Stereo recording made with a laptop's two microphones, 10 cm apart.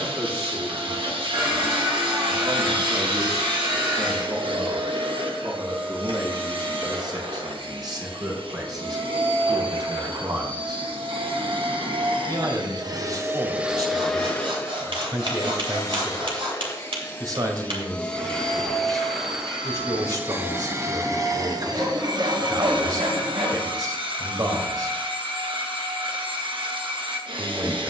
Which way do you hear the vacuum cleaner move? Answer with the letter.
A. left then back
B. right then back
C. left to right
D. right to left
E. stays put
A.